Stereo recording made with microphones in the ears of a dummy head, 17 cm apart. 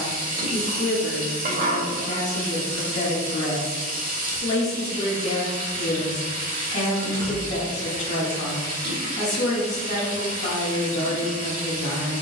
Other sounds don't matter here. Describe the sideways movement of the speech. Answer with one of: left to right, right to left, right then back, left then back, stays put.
stays put.